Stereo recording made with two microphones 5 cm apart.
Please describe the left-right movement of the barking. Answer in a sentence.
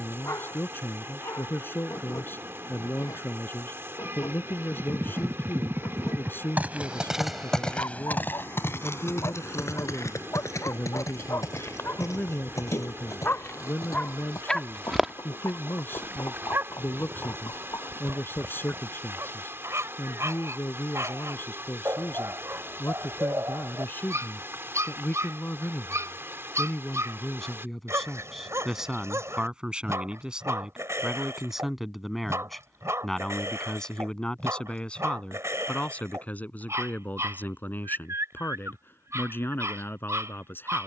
You can hear the barking move from left to right.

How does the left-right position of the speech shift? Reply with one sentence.
You can hear the speech move from left to right and back again.